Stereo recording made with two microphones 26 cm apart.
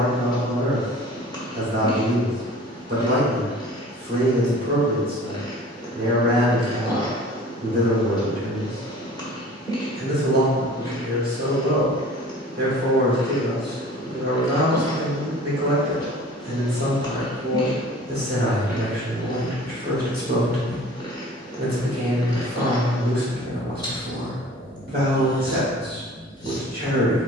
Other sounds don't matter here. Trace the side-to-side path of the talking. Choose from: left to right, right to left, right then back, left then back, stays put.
stays put.